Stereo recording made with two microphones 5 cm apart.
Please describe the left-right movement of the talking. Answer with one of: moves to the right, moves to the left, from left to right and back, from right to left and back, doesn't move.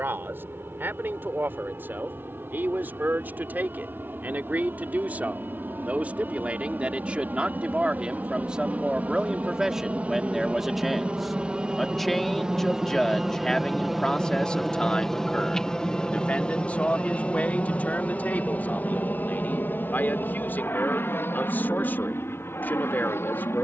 moves to the left.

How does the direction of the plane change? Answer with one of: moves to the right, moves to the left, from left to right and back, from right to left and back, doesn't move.
moves to the left.